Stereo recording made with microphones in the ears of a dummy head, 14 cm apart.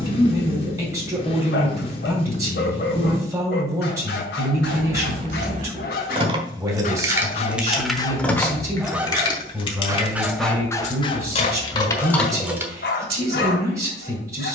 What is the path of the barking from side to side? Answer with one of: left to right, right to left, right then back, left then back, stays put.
right then back.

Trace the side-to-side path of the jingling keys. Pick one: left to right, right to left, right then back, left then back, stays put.
left then back.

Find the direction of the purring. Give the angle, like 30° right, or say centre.
40° left.